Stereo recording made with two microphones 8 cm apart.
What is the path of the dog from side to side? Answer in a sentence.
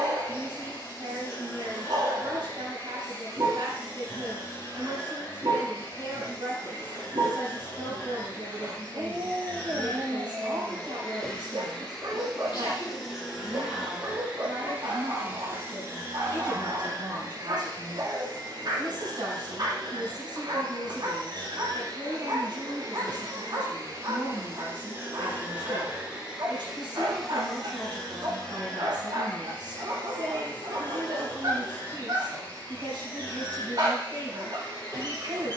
You can hear the dog stay in one place.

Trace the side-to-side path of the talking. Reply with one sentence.
In this clip you hear the talking stay in one place.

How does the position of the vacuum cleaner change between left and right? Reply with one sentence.
You can hear the vacuum cleaner move from left to right and back again.